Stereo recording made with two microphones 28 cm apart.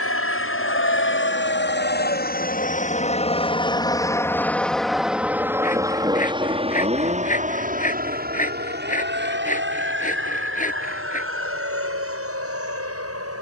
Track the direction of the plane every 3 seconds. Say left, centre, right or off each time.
left, centre, right, right, right.